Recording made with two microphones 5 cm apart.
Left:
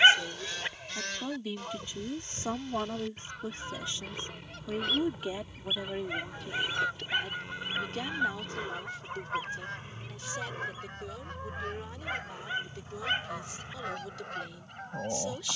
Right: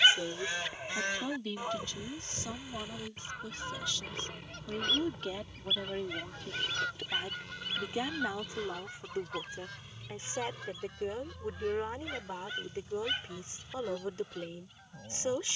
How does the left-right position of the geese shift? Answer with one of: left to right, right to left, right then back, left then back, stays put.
right to left.